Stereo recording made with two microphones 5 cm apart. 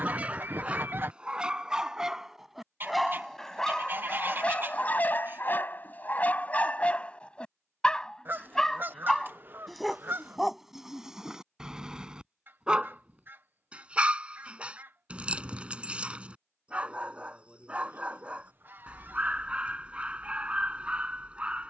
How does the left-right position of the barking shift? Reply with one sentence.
In this clip you hear the barking go left and come back.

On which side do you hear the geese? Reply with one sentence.
In this clip you hear the geese on the right.